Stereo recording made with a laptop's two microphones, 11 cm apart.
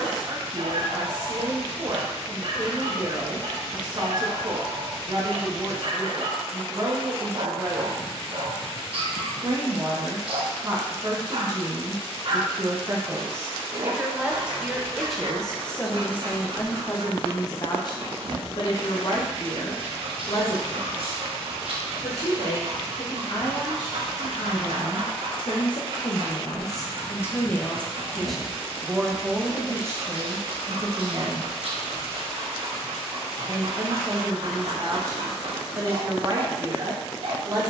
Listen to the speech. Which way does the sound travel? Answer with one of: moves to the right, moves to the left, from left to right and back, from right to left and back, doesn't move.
from right to left and back.